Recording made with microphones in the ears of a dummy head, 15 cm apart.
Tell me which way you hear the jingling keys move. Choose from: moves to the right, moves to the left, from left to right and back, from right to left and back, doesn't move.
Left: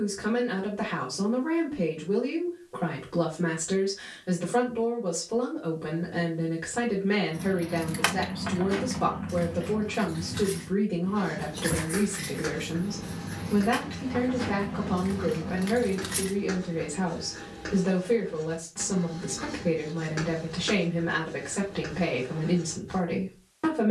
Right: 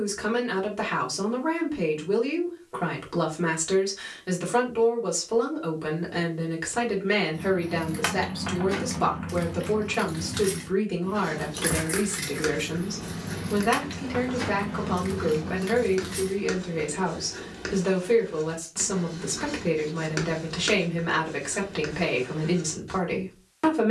from left to right and back.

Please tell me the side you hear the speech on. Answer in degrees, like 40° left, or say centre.
60° right.